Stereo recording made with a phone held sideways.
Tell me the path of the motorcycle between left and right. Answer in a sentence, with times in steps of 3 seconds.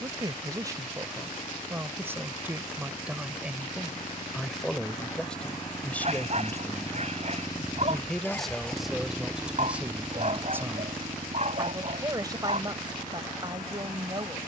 You can hear the motorcycle on the left from 0 s and on the right from 9 s.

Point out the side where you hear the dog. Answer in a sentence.
You can hear the dog on the right.